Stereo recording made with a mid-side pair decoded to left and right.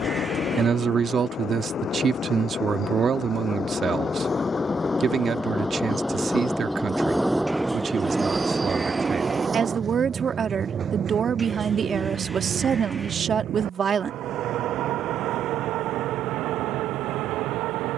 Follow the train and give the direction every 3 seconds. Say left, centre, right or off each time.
left, left, centre, right, right, right.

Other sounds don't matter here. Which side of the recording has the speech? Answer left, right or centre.
right.